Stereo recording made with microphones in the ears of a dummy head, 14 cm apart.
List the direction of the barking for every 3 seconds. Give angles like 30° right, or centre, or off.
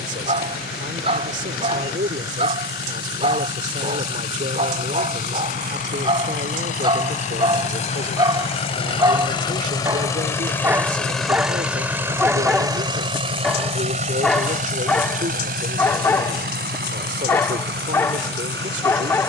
40° right, 40° right, 30° right, 10° right, centre, 10° left, 10° left.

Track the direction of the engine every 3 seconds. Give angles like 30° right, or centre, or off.
70° left, 60° left, 50° left, 10° left, 40° right, 60° right, 70° right.